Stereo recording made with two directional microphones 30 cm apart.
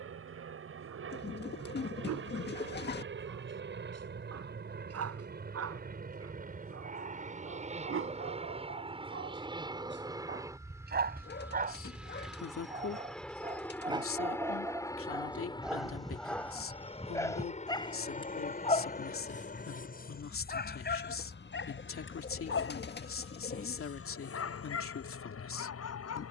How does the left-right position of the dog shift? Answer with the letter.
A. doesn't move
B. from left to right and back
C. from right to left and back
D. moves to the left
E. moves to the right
D.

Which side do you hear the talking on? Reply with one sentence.
You can hear the talking on the left.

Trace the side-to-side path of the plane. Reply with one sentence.
In this clip you hear the plane move from right to left.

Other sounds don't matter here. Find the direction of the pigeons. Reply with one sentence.
You can hear the pigeons on the left.